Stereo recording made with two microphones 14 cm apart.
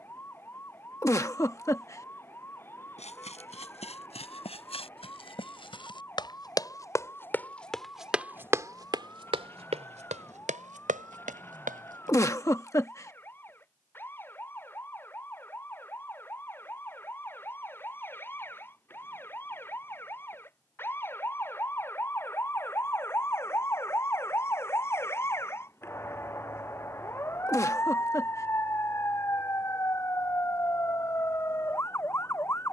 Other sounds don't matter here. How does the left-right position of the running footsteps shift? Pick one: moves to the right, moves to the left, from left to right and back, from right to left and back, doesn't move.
moves to the right.